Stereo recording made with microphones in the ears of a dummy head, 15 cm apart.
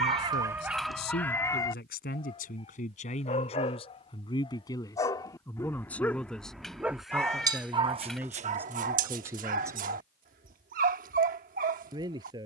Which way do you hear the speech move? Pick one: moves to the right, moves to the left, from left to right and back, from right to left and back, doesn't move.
moves to the right.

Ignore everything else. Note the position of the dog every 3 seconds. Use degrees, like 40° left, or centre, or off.
centre, 30° left, 20° right, 60° right.